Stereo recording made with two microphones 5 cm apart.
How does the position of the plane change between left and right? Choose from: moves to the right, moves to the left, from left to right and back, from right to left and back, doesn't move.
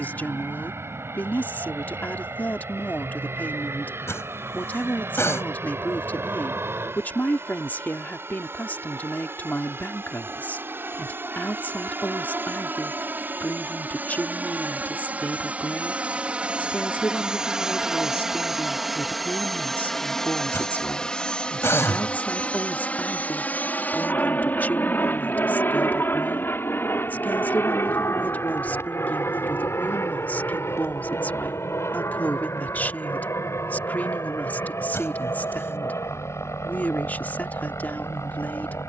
moves to the left.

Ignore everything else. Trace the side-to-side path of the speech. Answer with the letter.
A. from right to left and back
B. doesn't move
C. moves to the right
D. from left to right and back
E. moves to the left
B.